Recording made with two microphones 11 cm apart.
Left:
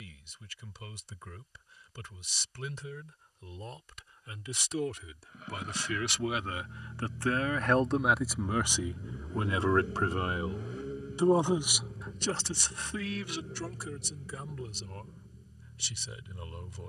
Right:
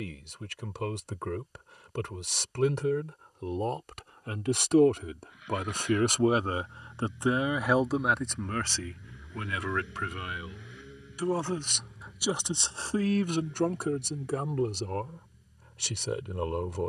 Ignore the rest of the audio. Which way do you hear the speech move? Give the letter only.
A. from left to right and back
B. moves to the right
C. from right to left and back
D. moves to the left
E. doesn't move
C.